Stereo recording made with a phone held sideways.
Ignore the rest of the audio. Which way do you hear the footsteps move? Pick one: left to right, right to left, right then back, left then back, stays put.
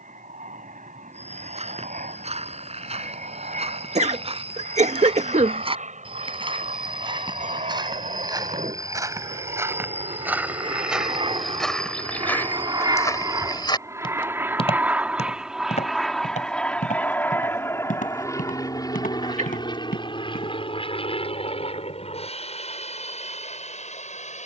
right to left.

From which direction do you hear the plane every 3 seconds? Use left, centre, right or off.
right, right, right, right, right, centre, left, left.